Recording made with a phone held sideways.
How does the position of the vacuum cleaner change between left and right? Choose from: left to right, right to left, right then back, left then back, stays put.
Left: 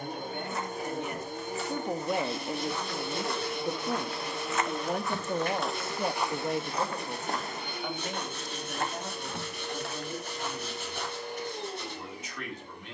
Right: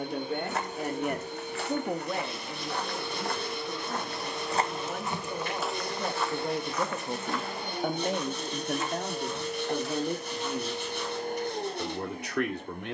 left to right.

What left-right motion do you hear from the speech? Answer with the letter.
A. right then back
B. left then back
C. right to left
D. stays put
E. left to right
B.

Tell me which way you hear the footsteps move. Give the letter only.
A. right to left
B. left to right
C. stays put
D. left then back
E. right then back
A.